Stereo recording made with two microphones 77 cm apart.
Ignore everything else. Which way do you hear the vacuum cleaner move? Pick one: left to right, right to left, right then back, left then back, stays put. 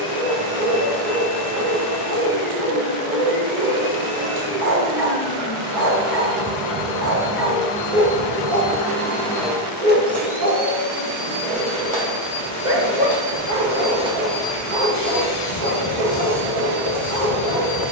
right then back.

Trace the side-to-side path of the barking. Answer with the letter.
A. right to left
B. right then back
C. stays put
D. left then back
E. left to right
C.